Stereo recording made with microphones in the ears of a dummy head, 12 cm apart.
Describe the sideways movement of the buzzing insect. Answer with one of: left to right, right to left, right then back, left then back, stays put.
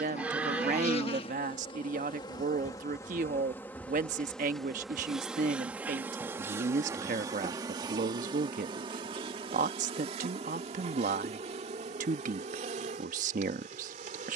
left to right.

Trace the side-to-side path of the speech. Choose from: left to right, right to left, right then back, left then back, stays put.
stays put.